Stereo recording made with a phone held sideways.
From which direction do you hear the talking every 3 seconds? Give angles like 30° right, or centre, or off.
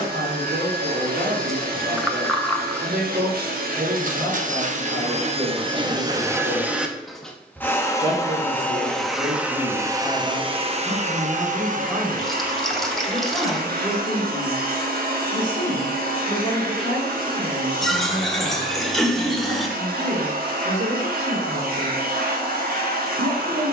70° right, 70° right, 50° right, 20° right, centre, 10° left, 20° right, 60° right.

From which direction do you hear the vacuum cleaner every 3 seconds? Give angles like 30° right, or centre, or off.
70° right, 50° right, centre, 30° right, 70° right, 70° right, 70° right, 70° right.